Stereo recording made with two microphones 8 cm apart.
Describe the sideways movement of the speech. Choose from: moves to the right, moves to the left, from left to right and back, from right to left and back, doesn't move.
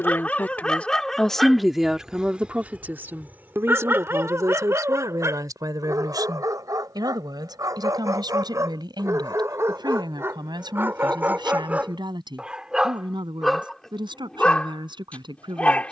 moves to the right.